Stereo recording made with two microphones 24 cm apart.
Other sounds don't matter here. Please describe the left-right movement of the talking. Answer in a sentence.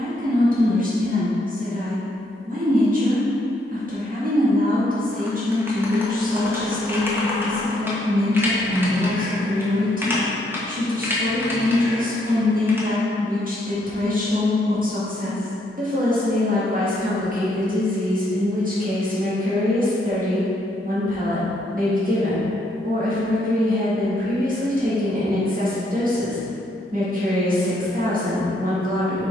In this clip you hear the talking stay put.